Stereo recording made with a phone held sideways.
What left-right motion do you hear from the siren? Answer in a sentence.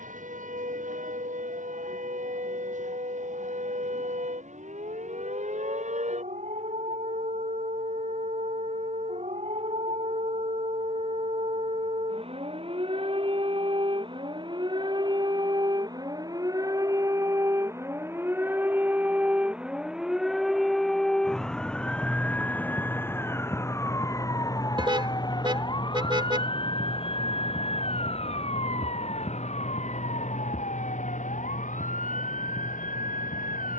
You can hear the siren travel towards the left.